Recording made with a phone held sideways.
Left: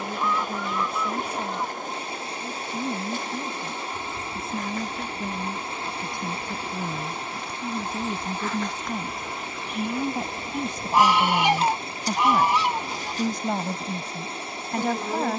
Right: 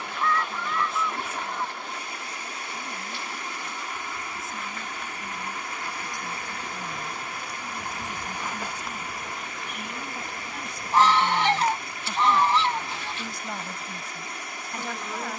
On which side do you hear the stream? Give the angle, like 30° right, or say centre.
30° left.